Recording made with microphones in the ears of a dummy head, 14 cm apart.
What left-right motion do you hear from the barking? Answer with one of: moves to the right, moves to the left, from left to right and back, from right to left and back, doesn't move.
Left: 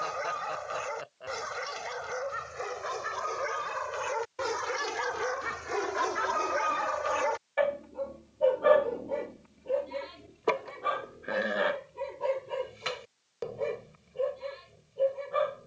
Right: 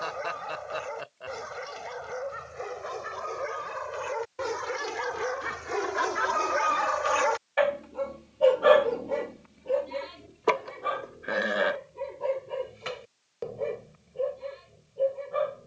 from left to right and back.